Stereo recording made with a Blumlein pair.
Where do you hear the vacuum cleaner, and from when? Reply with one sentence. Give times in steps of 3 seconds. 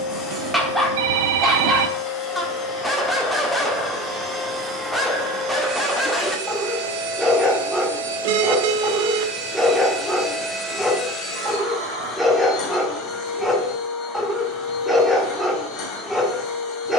You can hear the vacuum cleaner on the left from 0 s, in the centre from 3 s, on the right from 6 s, in the centre from 9 s and on the left from 12 s.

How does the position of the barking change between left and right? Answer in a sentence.
You can hear the barking stay in one place.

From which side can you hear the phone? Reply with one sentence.
You can hear the phone on the right.